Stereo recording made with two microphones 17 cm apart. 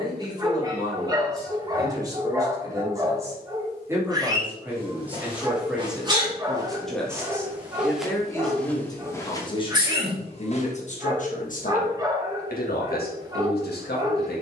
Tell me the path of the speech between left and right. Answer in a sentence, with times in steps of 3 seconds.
You can hear the speech on the right from 0 s, in the centre from 3 s and on the left from 9 s.